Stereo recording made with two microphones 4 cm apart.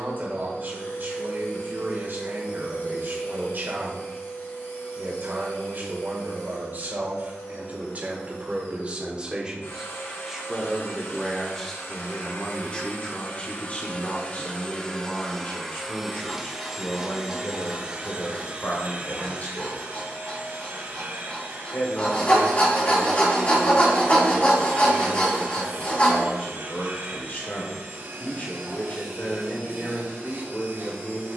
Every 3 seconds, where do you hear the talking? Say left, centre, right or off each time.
right, right, right, centre, left, left, left, left, left, left, left.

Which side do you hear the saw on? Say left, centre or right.
left.